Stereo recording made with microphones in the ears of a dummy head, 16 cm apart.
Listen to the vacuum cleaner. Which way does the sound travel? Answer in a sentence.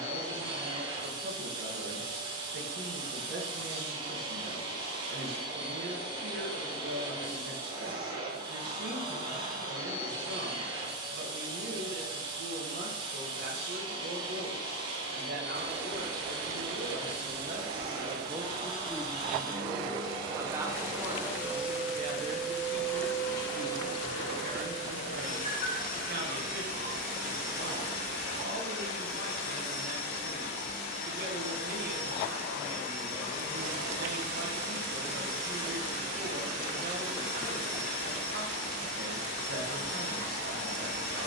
In this clip you hear the vacuum cleaner travel towards the left.